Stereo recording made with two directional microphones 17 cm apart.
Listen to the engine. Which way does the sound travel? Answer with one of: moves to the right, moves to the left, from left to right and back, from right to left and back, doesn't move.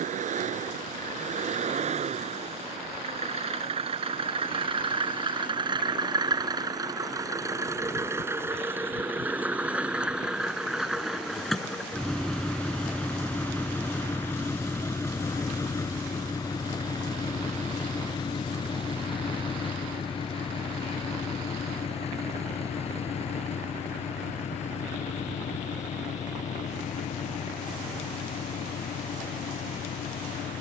moves to the left.